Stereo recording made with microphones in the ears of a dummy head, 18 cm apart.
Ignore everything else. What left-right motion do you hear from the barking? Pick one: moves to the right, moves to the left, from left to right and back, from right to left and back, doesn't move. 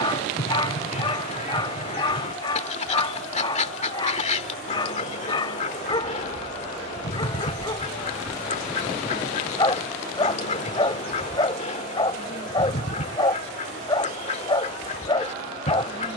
doesn't move.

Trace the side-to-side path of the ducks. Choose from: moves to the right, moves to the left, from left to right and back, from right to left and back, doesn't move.
doesn't move.